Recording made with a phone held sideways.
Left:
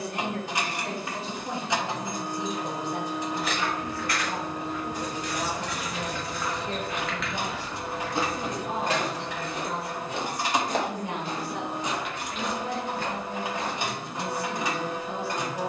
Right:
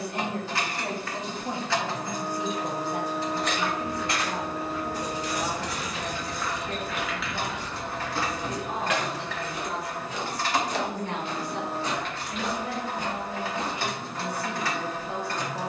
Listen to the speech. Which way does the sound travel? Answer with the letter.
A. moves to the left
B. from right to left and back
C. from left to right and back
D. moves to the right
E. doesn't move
B.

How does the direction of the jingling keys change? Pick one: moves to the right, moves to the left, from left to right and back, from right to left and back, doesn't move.
from left to right and back.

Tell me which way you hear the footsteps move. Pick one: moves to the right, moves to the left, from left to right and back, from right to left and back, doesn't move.
from right to left and back.